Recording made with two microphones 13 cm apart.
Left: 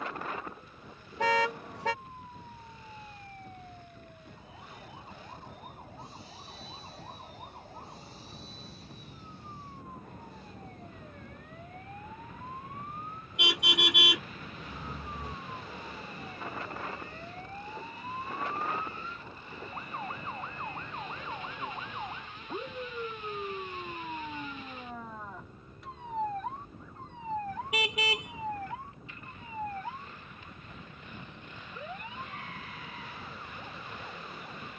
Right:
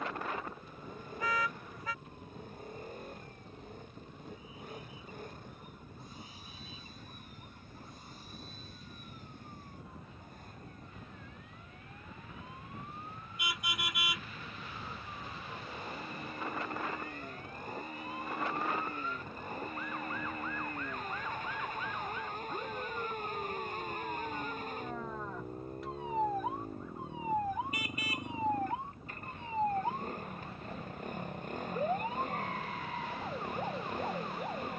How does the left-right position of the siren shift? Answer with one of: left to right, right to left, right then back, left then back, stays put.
left to right.